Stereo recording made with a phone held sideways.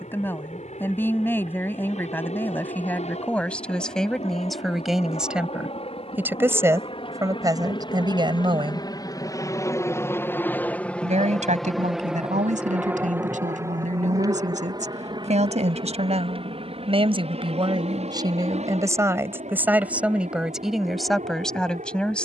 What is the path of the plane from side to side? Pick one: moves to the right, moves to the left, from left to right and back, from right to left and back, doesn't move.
moves to the right.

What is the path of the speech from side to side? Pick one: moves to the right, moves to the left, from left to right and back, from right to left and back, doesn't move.
from left to right and back.